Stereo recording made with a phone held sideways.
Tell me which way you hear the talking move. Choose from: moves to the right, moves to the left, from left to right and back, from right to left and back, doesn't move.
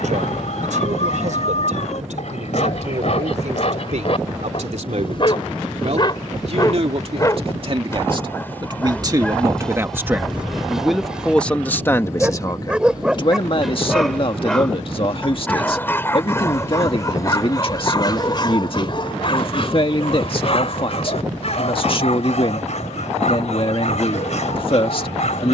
moves to the left.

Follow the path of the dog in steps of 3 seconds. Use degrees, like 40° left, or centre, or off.
60° left, 50° left, 20° left, centre, centre, 20° left, 40° left, 60° left, 60° left.